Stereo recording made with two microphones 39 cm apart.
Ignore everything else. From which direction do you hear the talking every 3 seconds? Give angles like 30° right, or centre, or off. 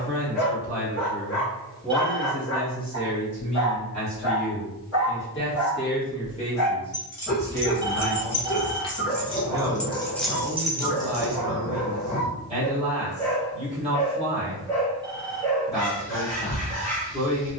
centre, 40° left, 10° left, 20° right, 20° right, 20° right.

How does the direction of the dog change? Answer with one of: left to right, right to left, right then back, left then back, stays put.
stays put.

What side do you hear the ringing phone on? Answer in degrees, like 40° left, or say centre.
10° right.